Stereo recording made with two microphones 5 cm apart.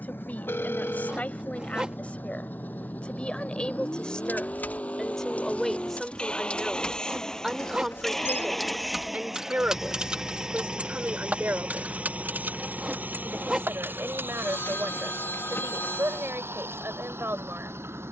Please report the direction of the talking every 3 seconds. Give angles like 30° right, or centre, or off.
30° left, 20° left, 10° right, 40° right, 60° right, 60° right.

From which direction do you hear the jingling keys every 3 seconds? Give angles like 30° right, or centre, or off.
off, 40° left, 10° left, 20° right, 50° right, off.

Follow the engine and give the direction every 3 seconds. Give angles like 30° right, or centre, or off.
40° left, 30° left, 10° left, 20° right, 40° right, 60° right.